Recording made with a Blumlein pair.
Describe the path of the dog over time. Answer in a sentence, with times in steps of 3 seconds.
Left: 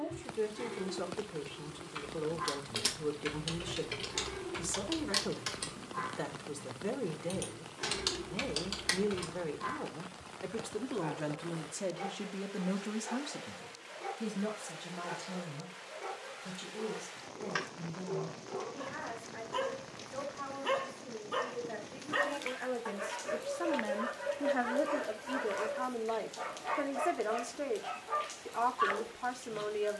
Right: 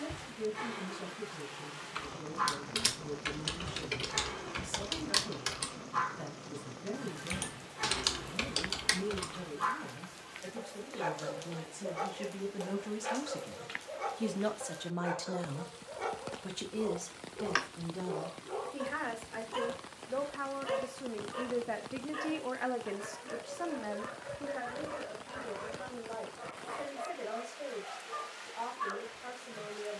In this clip you hear the dog on the right from 0 s, in the centre from 18 s and on the left from 21 s.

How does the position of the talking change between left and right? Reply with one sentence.
In this clip you hear the talking move from left to right and back again.